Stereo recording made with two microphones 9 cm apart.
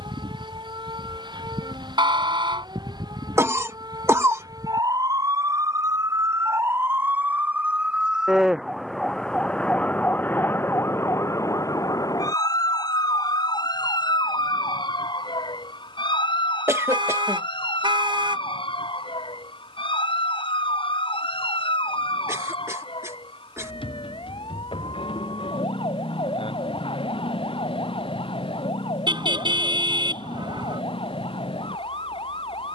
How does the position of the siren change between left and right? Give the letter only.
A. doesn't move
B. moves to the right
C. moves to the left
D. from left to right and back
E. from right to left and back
C.